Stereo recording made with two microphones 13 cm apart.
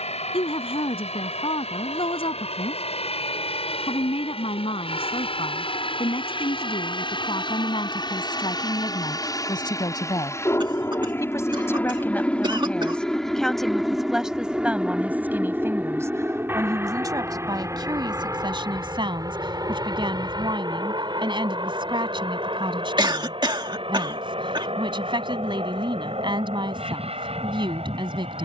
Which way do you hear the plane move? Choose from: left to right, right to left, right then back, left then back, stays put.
left to right.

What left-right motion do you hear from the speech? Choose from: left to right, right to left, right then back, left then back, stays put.
left to right.